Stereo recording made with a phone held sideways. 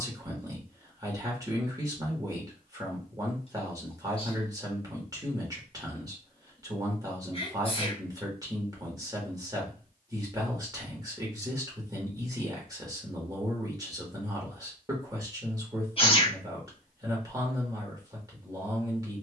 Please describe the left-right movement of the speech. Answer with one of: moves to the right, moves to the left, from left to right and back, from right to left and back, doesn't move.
doesn't move.